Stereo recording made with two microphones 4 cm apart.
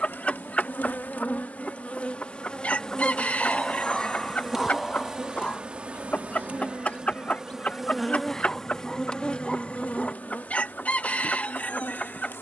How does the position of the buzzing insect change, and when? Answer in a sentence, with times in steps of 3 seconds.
You can hear the buzzing insect on the left from 0 s, in the centre from 3 s and on the left from 9 s.